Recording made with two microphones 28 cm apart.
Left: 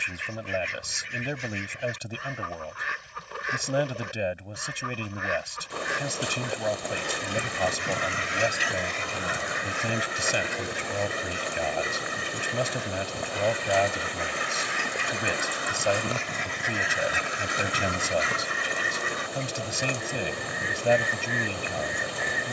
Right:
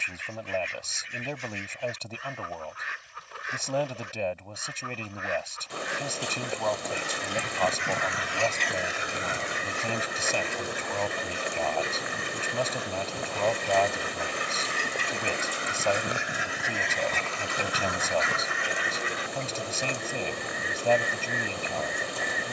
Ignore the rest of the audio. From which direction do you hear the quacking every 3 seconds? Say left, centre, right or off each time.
left, left, left, right, right, centre, left, left.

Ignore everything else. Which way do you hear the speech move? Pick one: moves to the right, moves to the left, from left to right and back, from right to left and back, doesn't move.
doesn't move.